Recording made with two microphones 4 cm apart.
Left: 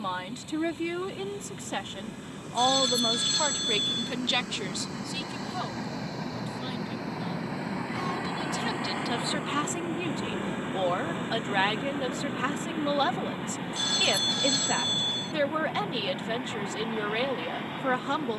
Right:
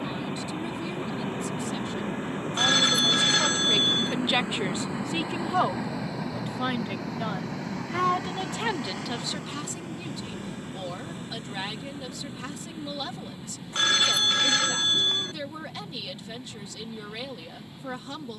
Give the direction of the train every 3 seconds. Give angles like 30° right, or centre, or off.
50° right, 20° right, 10° left, 30° left, 50° left, 60° left.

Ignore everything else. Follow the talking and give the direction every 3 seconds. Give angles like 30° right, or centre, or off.
50° left, 20° right, 60° right, 40° left, 50° left, 50° left.